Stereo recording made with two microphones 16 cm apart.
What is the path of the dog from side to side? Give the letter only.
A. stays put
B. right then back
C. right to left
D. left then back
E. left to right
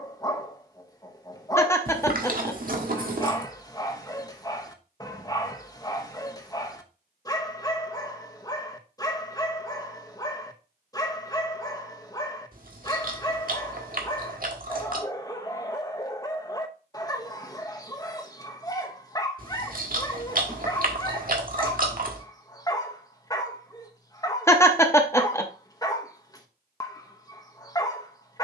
A.